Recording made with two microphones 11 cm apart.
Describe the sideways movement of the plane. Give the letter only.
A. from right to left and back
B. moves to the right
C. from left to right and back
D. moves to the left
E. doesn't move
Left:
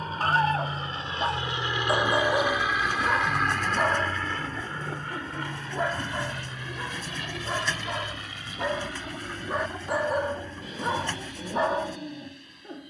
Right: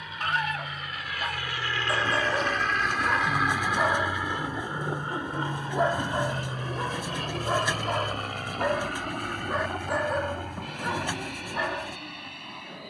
B.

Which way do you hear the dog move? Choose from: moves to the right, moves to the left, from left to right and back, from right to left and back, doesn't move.
from left to right and back.